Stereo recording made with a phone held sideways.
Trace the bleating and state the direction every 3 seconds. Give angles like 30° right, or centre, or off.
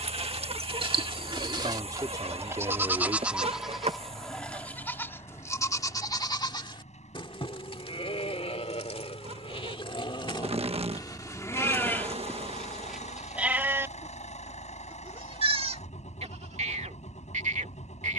30° right, 10° left, 40° left, 30° left, 10° right, 50° right.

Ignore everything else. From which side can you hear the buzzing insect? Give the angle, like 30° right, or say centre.
40° right.